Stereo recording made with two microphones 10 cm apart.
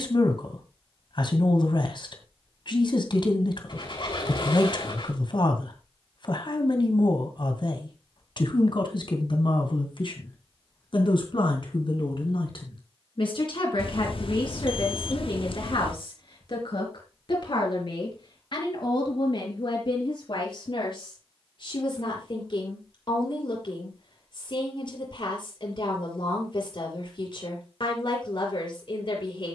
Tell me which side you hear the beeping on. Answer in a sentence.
You can hear the beeping on the left.